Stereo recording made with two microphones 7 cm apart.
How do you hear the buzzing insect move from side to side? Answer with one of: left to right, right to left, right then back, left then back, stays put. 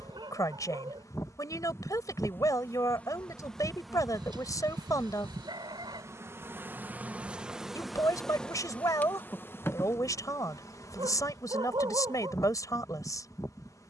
right then back.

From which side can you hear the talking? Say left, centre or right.
left.